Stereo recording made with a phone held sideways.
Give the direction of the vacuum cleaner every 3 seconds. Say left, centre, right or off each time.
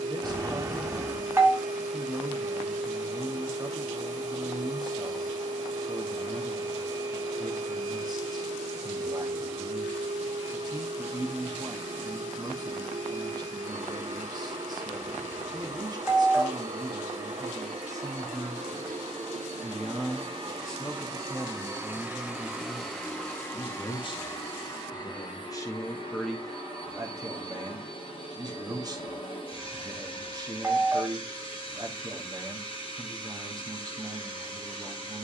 right, right, right, right, right, right, right, centre, left, left, left, left.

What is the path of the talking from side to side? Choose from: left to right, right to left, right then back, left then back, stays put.
left then back.